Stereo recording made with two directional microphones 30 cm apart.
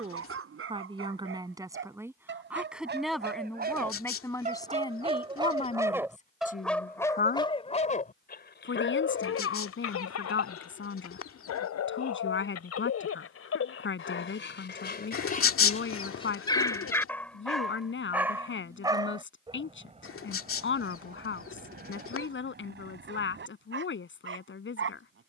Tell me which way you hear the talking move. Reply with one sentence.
In this clip you hear the talking move from right to left.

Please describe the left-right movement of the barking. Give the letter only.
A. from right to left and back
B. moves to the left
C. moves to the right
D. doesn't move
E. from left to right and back
A.